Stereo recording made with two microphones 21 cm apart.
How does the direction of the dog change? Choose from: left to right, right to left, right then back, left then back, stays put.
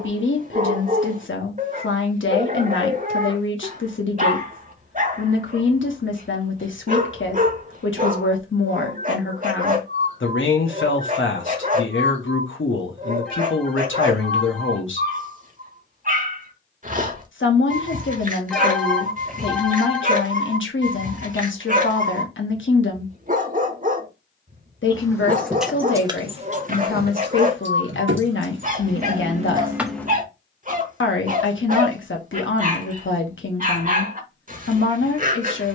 stays put.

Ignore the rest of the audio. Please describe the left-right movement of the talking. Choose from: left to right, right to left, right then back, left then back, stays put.
stays put.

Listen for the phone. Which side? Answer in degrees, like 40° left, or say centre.
centre.